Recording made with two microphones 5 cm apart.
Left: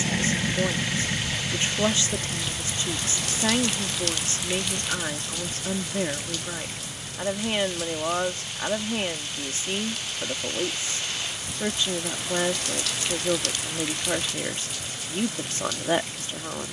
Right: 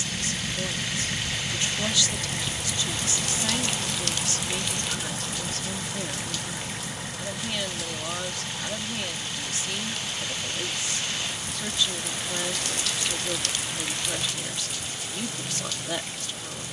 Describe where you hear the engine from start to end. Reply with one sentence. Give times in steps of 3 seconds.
In this clip you hear the engine in the centre from 0 s and on the right from 3 s.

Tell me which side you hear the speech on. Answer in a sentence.
In this clip you hear the speech on the left.